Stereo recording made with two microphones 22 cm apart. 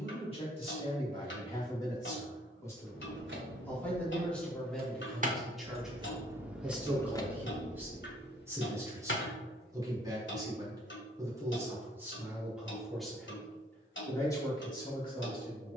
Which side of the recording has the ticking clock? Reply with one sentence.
In this clip you hear the ticking clock on the left.